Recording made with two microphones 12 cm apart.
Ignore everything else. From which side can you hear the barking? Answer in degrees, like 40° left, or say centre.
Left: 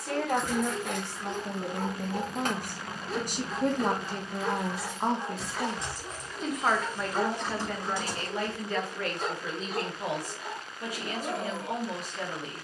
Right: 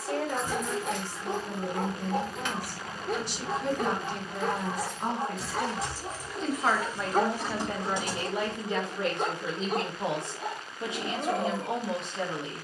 50° right.